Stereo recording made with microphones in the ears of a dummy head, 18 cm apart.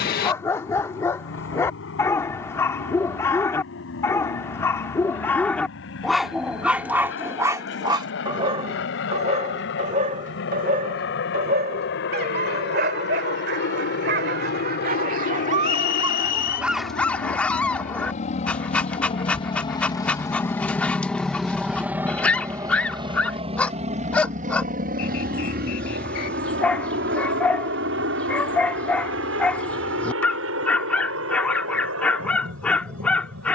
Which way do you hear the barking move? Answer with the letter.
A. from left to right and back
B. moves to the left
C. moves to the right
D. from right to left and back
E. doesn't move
A.